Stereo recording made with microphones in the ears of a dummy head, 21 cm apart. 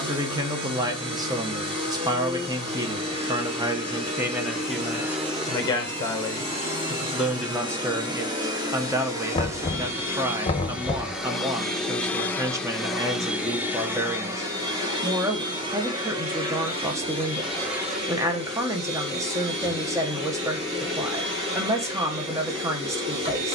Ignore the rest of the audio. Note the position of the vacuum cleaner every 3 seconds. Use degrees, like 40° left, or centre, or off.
30° right, 30° right, 20° right, 10° right, 10° right, 20° right, 30° right, 30° right.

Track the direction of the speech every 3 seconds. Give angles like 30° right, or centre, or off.
20° right, centre, centre, 10° right, 10° right, 10° right, 10° right, 10° right.